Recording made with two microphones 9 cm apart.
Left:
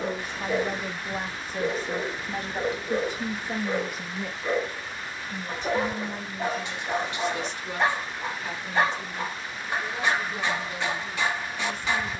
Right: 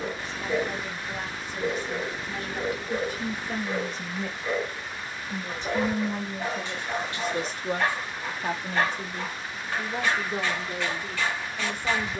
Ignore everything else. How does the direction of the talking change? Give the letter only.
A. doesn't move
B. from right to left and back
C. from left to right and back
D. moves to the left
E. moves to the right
E.